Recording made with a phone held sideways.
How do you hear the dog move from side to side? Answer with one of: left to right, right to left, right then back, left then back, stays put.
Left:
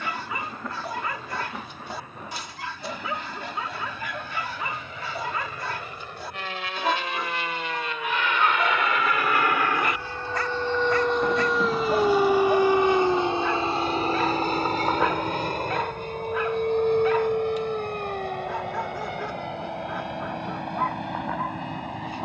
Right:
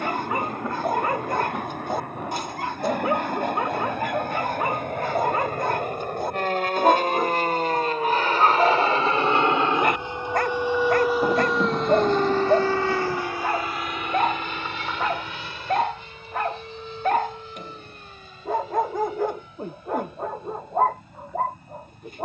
stays put.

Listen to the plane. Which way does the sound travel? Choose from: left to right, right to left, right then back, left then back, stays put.
right to left.